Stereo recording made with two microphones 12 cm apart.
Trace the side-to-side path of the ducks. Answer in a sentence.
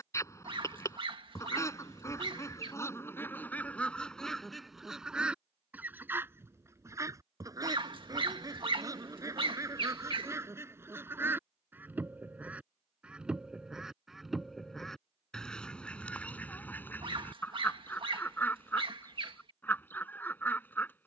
You can hear the ducks go right and come back.